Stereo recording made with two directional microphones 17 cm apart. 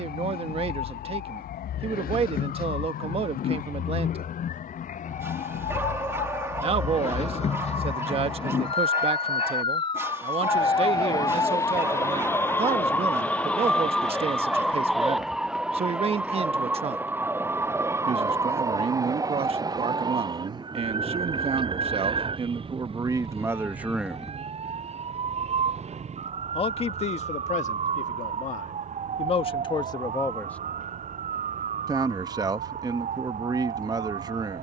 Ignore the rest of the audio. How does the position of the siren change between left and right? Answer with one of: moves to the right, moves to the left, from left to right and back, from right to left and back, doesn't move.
moves to the right.